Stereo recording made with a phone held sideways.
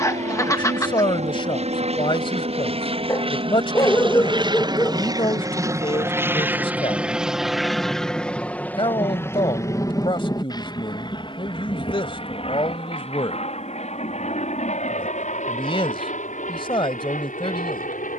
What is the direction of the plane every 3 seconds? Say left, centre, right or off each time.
right, right, centre, left, left, left.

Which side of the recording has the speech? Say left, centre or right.
left.